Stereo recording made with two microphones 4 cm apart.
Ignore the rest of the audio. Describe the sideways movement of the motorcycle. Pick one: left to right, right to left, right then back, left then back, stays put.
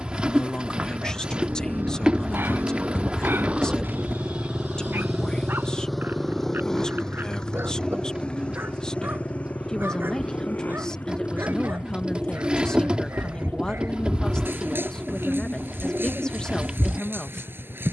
right to left.